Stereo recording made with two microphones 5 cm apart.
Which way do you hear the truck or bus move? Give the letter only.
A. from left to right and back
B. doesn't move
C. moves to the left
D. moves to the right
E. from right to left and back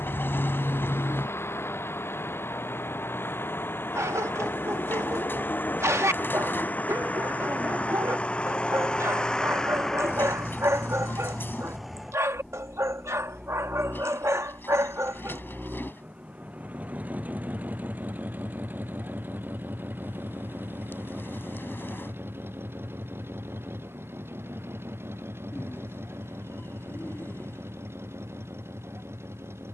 D.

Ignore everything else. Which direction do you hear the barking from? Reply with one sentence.
In this clip you hear the barking on the right.